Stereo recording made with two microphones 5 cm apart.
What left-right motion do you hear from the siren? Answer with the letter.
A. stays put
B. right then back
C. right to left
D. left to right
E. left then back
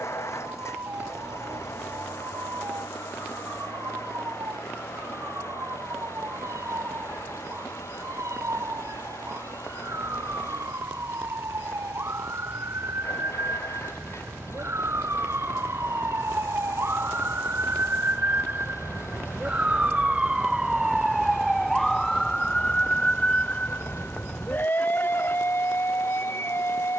C.